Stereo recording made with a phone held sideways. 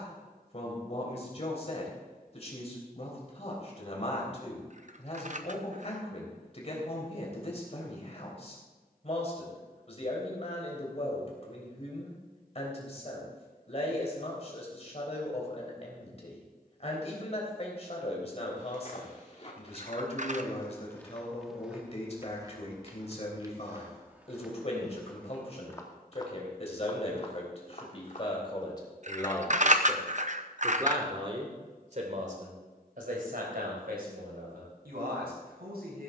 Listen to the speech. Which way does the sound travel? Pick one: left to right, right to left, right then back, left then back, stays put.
left to right.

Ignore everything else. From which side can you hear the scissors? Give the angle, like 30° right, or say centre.
50° right.